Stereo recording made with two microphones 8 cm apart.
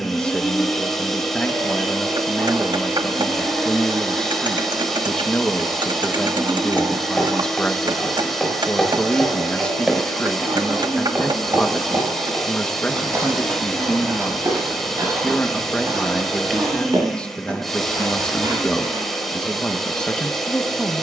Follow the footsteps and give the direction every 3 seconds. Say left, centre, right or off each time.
off, off, centre, right, right, right, right.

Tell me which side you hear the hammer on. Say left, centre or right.
right.